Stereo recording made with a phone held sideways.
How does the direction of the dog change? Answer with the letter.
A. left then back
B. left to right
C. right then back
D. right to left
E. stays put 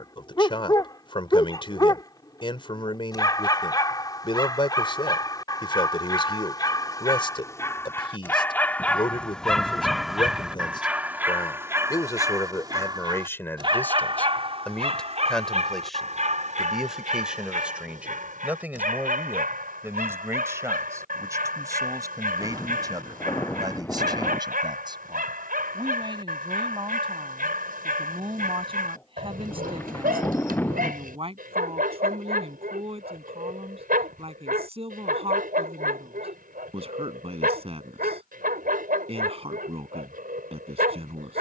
B.